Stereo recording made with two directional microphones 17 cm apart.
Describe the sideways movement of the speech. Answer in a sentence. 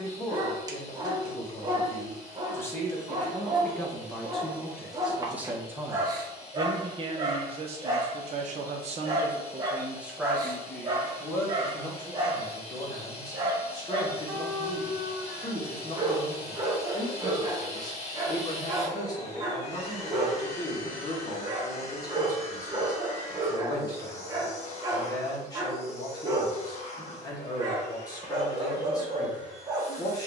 You can hear the speech go right and come back.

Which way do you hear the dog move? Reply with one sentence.
You can hear the dog stay in one place.